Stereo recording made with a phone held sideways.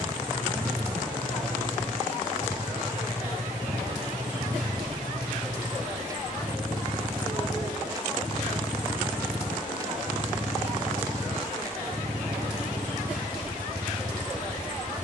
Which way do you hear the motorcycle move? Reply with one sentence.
You can hear the motorcycle stay put.